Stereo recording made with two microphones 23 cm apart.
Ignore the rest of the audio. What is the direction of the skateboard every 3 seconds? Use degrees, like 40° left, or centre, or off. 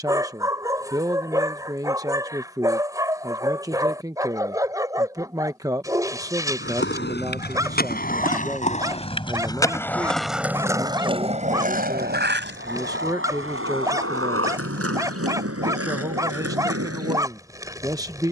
off, off, 40° left, 10° right, 60° right, 80° right.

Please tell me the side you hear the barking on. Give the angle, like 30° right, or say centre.
10° right.